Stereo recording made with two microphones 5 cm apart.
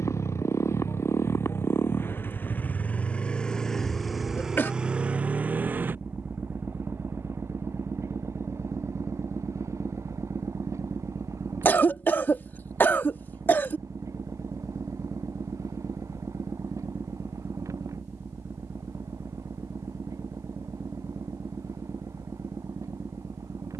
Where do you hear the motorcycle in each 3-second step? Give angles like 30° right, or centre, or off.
50° left, 10° right, 50° right, 70° right, 70° right, 70° right, 80° right, 80° right.